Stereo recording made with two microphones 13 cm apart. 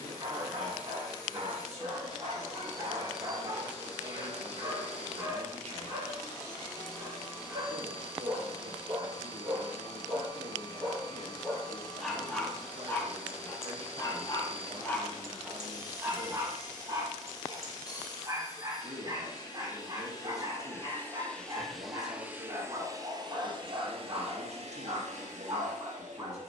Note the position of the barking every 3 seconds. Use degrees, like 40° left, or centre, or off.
30° right, 30° right, 30° right, 10° right, 20° left, 20° right, 30° right, 30° right, 30° right.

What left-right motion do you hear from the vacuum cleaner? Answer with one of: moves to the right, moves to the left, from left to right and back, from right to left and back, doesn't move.
moves to the right.